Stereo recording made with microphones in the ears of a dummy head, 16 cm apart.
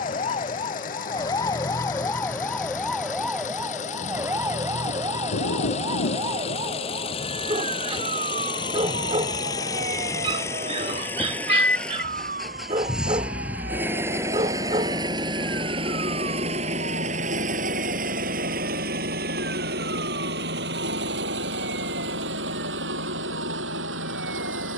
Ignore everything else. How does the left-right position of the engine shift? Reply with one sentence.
You can hear the engine move to the right.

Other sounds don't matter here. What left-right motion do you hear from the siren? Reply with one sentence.
You can hear the siren move to the right.